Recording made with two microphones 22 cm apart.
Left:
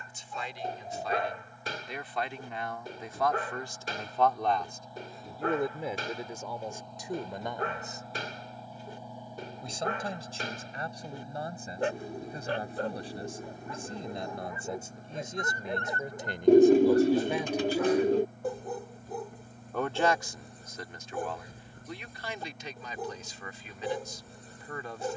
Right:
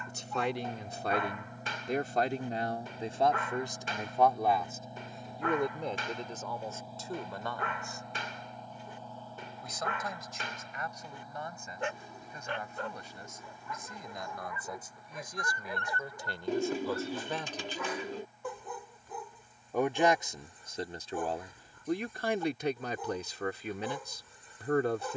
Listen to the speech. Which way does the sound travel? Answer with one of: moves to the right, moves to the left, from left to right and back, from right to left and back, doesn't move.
from right to left and back.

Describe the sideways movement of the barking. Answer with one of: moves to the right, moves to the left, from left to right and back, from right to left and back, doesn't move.
doesn't move.